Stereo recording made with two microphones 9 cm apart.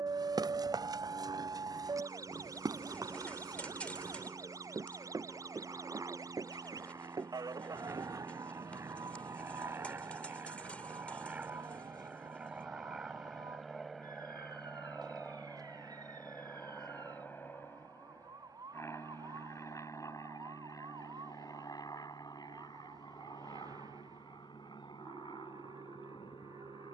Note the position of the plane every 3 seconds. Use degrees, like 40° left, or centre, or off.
60° right, 50° right, 40° right, 20° right, centre, 20° left, 30° left, 40° left, 50° left.